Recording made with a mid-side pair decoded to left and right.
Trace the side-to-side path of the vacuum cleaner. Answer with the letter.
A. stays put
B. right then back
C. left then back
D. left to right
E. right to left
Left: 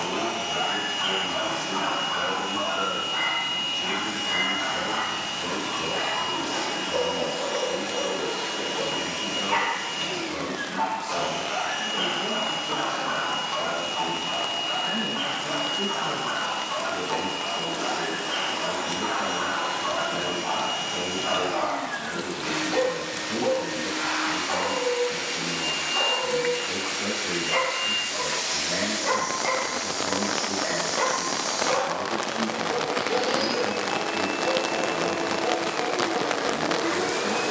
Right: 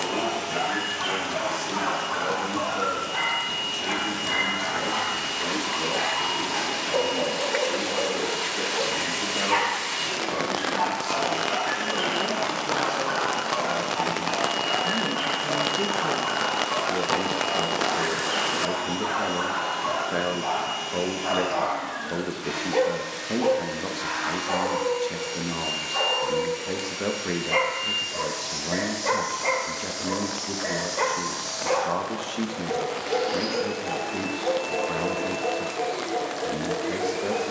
A.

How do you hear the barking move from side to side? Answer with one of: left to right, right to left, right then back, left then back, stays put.
stays put.